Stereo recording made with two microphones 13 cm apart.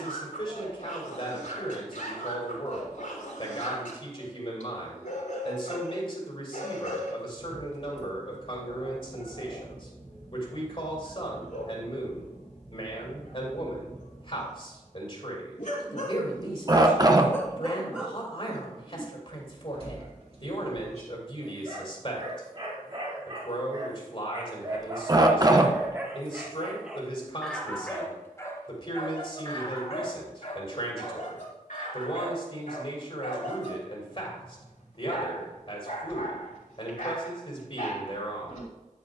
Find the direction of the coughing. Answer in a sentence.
In this clip you hear the coughing on the right.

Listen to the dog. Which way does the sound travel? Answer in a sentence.
In this clip you hear the dog move from left to right and back again.